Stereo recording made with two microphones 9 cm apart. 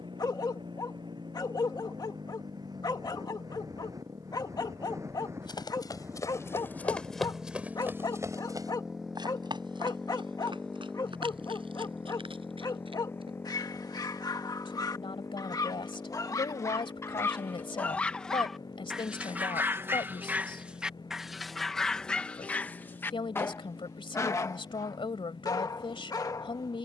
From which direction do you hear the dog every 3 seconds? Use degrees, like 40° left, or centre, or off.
50° left, 50° left, 50° left, 50° left, 50° left, 30° left, 10° right, 10° left, 40° left.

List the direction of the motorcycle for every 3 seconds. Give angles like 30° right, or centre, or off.
50° right, 40° right, 20° right, 10° left, 30° left, 40° left, 50° left, 50° left, 60° left.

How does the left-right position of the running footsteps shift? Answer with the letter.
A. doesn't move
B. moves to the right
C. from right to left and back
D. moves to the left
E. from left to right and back
B.